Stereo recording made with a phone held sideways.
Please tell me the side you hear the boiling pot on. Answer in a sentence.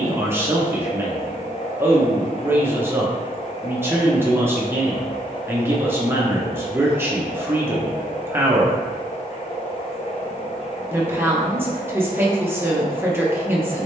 In this clip you hear the boiling pot on the left.